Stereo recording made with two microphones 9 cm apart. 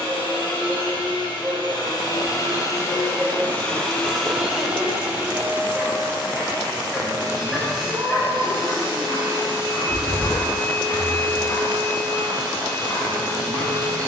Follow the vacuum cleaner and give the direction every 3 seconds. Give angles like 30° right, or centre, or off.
50° left, centre, 40° right, 60° right, 60° right.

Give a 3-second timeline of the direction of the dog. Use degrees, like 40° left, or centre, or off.
30° right, 30° right, 10° left, 40° left, 60° left.